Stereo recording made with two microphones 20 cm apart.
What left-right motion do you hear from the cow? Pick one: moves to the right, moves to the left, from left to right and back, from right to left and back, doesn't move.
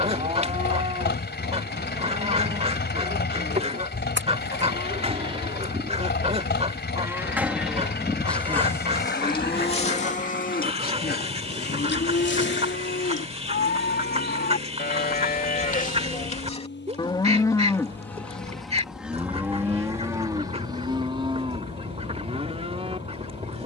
from right to left and back.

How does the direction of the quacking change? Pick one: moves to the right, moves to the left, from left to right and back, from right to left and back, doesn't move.
doesn't move.